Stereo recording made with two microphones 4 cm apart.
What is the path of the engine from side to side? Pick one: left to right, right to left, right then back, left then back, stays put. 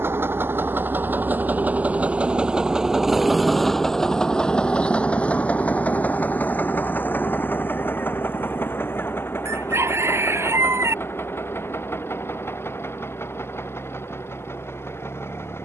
right to left.